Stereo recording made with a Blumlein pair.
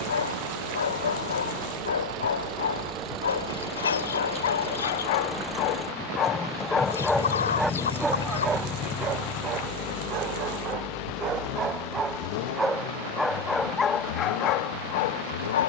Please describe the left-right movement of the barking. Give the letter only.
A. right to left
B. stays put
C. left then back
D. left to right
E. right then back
E.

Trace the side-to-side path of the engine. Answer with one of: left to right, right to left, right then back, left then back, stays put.
right to left.